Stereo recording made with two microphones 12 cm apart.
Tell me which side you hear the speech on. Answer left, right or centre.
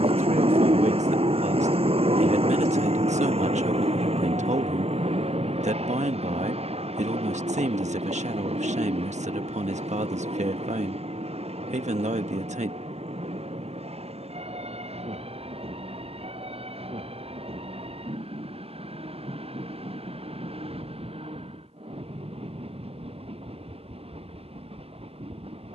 right.